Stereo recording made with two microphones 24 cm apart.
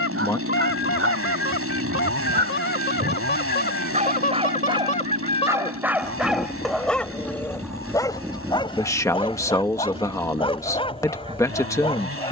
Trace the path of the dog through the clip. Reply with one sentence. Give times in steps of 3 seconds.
In this clip you hear the dog on the right from 0 s, in the centre from 6 s and on the left from 9 s.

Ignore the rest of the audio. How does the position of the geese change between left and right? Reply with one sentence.
You can hear the geese travel towards the right.